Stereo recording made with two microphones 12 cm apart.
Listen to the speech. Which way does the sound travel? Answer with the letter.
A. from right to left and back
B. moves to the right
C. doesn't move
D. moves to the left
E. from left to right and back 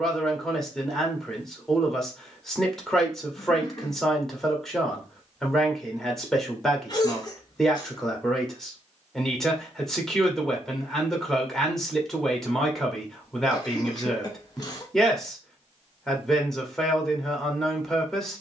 C.